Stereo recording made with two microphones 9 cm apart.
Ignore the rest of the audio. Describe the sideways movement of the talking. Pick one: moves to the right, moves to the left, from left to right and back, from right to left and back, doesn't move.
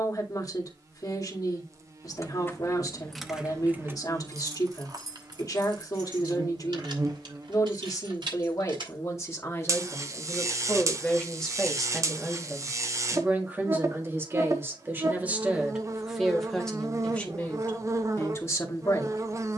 from left to right and back.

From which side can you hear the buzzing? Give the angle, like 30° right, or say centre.
40° right.